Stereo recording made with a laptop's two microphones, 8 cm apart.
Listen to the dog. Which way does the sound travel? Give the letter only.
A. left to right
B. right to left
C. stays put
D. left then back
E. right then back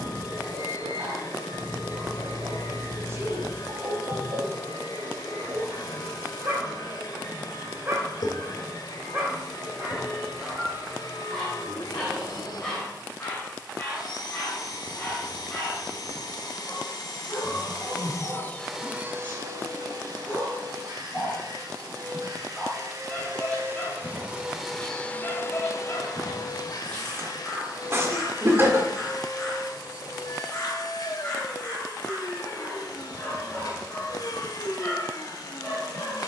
B.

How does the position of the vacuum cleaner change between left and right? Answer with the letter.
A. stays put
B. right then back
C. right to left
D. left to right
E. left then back
B.